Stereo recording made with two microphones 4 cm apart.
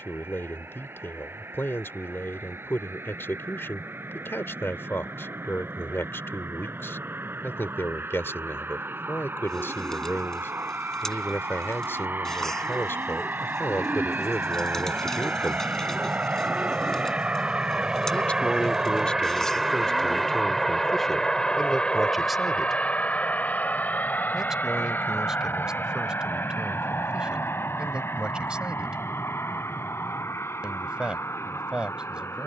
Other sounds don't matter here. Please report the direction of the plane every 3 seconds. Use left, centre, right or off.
right, right, right, right, right, right, centre, left, left, left, left.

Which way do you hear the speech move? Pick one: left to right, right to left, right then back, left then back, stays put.
left to right.